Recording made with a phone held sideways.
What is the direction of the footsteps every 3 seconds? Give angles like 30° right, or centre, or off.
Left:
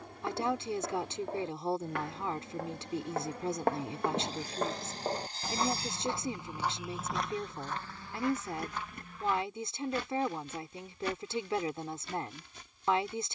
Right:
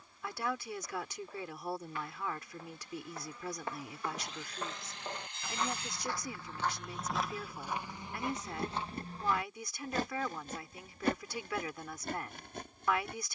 80° left, 50° left, 10° right, 50° right, 60° right.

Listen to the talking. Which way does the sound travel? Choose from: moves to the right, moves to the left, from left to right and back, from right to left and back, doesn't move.
doesn't move.